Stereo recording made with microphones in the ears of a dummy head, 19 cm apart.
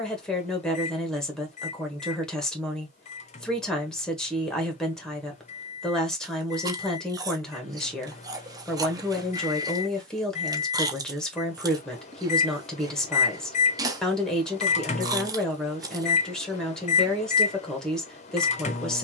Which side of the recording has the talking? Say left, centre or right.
centre.